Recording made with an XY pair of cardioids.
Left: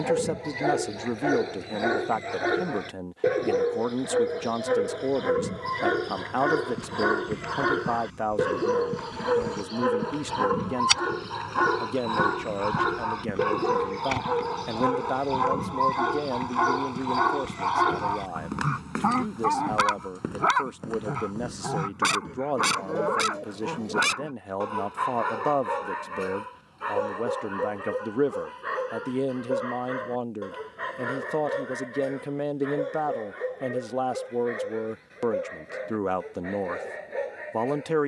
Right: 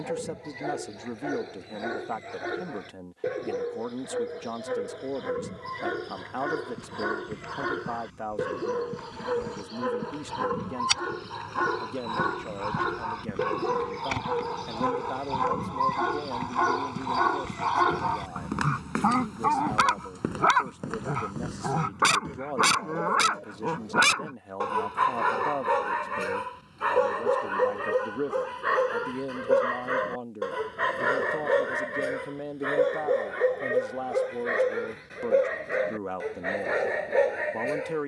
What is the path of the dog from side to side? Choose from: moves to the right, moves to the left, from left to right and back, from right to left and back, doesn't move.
moves to the right.